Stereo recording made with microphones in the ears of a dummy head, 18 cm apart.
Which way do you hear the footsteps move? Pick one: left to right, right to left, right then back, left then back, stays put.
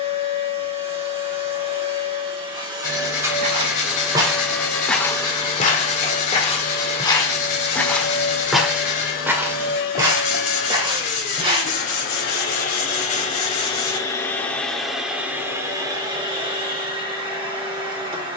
left then back.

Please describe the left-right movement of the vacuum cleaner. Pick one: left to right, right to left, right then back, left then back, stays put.
left then back.